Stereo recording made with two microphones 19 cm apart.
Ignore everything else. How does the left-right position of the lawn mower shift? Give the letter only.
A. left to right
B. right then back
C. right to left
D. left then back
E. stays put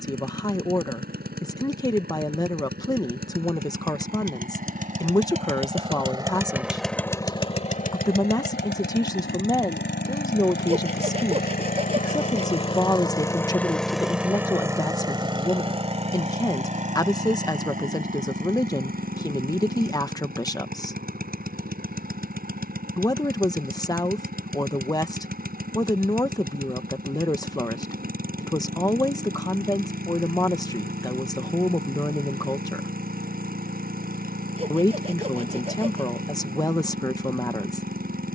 D.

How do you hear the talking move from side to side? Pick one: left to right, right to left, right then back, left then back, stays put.
stays put.